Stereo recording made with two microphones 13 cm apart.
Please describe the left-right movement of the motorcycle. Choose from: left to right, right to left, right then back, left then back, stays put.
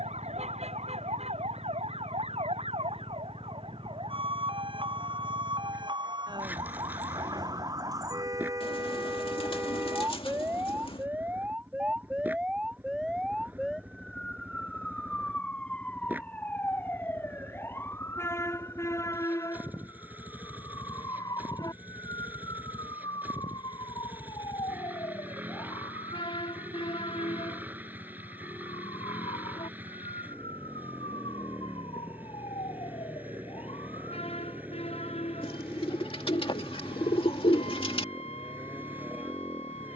stays put.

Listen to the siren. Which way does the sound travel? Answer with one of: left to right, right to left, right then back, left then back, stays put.
right to left.